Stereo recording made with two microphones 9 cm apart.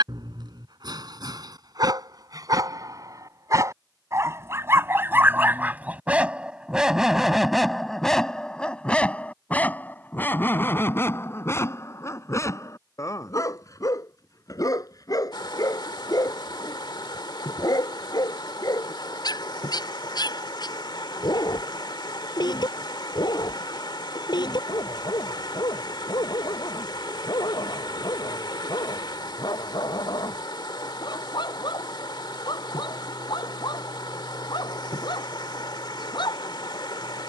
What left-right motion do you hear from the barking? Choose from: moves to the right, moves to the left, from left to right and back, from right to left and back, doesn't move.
moves to the left.